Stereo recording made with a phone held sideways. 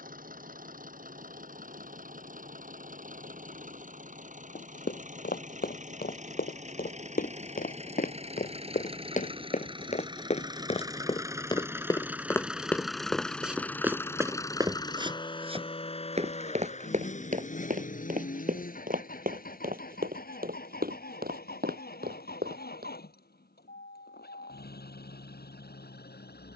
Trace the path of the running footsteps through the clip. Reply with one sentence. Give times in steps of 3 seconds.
In this clip you hear the running footsteps not at all from 0 s, on the left from 3 s, in the centre from 12 s, on the right from 15 s and not at all from 24 s.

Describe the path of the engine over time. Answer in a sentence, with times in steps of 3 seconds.
You can hear the engine on the right from 0 s, in the centre from 12 s and on the left from 15 s.